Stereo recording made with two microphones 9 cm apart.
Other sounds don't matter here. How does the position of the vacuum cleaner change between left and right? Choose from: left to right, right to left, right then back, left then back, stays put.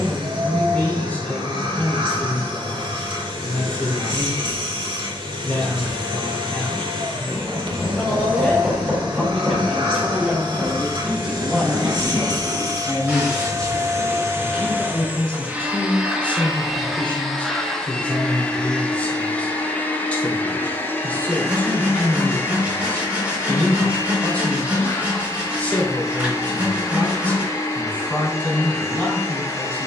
right to left.